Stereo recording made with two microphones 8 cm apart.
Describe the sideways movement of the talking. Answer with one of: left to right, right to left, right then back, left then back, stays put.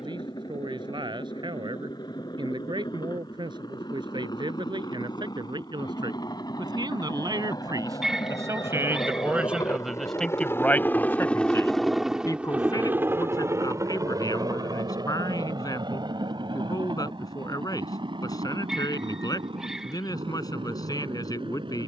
right to left.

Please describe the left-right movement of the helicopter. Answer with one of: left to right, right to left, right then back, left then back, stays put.
left to right.